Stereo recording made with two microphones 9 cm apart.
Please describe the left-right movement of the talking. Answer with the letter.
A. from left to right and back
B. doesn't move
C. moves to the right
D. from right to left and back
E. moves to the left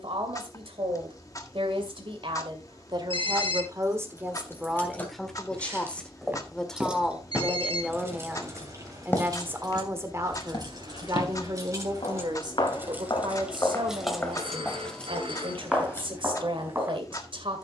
D.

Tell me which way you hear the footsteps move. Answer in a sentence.
In this clip you hear the footsteps move from right to left and back again.